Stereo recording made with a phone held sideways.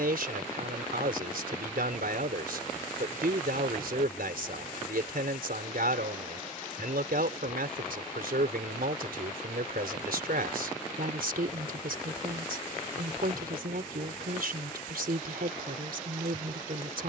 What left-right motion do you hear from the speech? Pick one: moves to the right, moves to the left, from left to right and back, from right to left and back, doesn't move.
doesn't move.